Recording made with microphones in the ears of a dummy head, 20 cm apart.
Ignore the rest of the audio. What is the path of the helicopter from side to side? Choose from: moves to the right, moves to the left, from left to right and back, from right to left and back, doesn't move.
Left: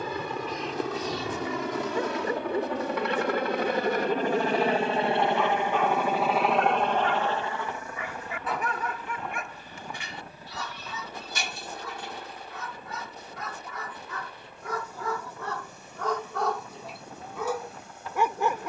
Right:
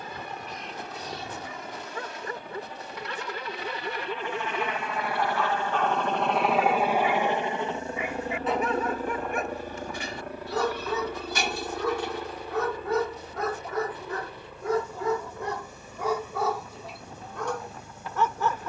moves to the right.